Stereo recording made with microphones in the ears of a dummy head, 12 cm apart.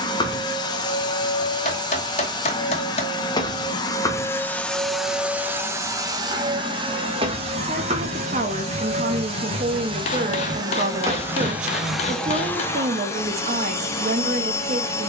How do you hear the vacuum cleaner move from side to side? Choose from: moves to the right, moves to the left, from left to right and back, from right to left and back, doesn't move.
from left to right and back.